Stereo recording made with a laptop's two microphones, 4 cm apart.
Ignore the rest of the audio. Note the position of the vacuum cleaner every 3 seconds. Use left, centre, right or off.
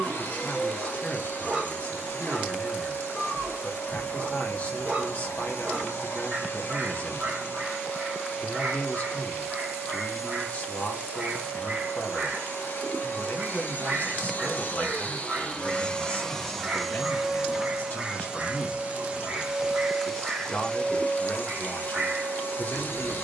left, left, left, left, left, centre, centre, left.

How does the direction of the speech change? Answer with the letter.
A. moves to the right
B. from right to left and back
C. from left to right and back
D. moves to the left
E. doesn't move
E.